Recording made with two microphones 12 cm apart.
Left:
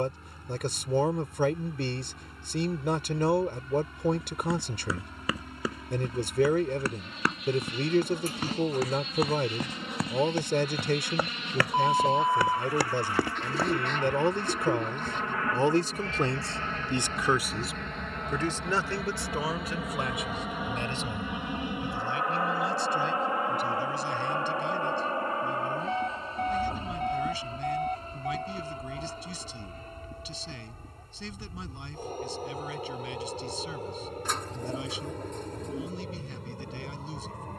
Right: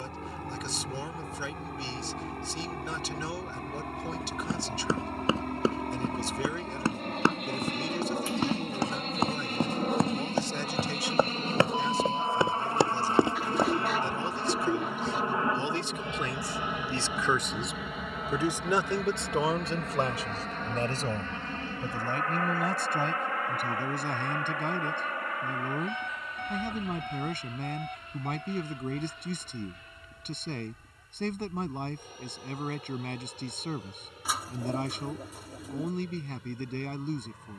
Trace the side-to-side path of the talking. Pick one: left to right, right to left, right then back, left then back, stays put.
left to right.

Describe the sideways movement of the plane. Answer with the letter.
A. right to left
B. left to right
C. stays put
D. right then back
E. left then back
A.